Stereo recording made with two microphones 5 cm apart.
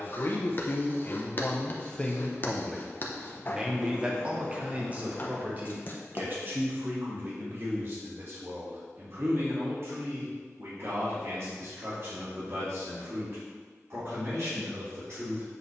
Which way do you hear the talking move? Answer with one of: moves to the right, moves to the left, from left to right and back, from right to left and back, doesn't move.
moves to the right.